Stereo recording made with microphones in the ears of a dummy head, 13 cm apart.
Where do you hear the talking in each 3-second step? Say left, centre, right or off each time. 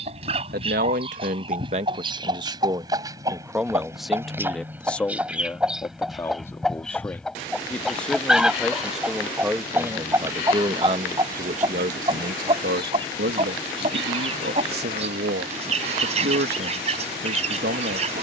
right, centre, centre, right, right, right.